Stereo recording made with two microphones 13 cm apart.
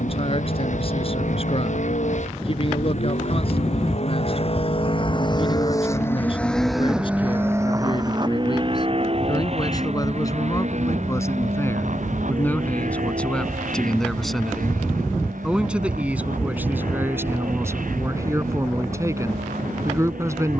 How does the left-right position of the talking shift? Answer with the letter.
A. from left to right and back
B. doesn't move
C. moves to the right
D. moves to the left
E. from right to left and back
C.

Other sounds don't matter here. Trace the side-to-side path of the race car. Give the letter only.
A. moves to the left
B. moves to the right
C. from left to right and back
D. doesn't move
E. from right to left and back
B.